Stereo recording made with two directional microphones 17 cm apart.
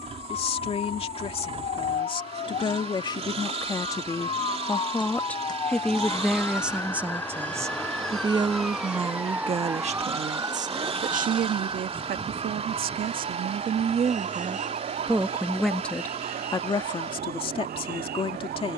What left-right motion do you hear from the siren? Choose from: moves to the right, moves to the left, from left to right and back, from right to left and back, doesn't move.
moves to the right.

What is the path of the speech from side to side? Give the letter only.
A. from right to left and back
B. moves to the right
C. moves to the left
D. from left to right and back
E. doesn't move
D.